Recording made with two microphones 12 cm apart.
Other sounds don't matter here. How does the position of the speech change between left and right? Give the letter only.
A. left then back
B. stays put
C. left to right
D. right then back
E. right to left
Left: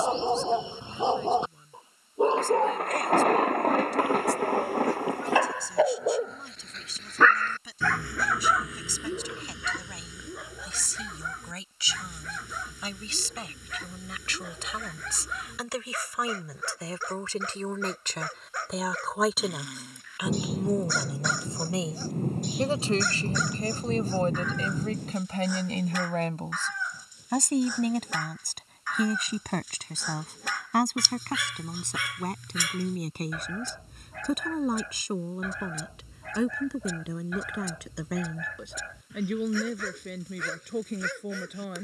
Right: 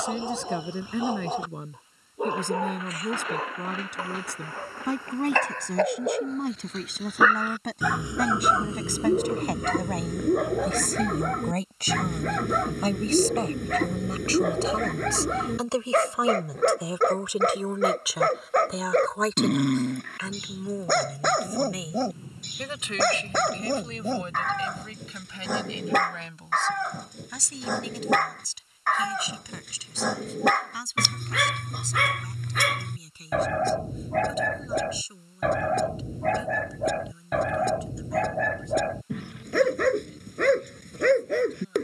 E.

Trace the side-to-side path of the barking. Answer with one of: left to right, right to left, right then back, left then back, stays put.
left to right.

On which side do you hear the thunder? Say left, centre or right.
left.